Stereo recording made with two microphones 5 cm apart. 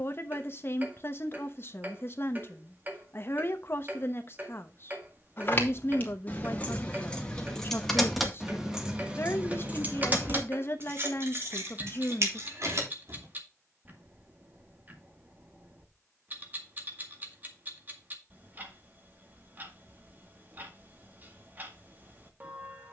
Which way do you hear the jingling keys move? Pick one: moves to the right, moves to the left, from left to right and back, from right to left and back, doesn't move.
moves to the right.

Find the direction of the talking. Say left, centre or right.
left.